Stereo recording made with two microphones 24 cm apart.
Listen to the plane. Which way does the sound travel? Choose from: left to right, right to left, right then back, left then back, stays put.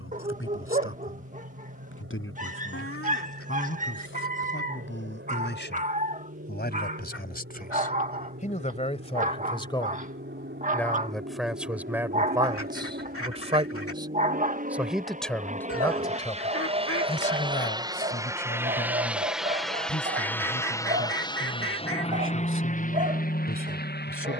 right to left.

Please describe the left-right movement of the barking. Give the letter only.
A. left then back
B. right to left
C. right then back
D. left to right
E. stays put
E.